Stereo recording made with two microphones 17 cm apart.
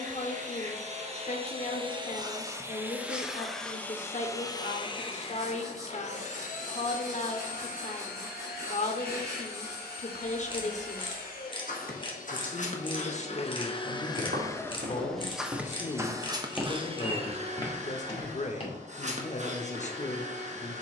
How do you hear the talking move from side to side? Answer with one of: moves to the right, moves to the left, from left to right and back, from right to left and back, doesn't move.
doesn't move.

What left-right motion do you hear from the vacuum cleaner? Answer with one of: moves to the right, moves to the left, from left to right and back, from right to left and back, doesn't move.
from right to left and back.